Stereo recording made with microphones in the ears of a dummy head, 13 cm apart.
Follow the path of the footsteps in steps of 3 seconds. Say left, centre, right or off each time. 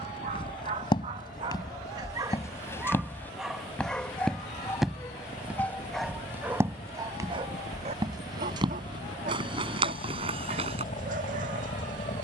left, centre, right, right.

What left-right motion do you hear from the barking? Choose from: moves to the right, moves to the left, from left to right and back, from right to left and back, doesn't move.
from right to left and back.